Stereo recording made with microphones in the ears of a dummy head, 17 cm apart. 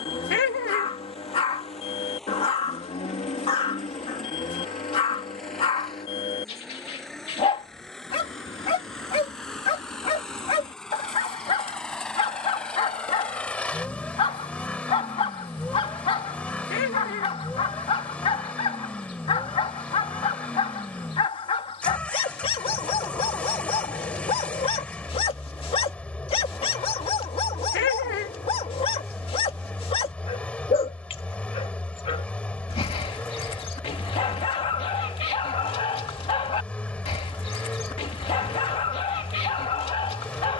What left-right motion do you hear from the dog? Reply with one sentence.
You can hear the dog stay put.